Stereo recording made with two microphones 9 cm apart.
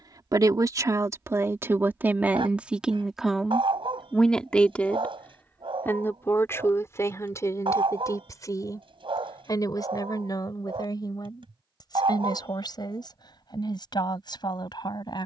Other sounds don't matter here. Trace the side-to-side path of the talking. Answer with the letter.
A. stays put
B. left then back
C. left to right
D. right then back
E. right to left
E.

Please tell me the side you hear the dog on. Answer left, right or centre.
right.